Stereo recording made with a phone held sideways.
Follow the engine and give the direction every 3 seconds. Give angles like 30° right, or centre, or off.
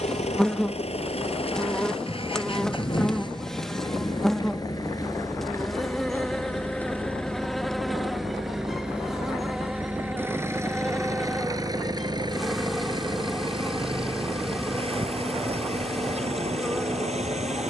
50° left, 30° left, 10° left, 20° right, 40° right, 50° right.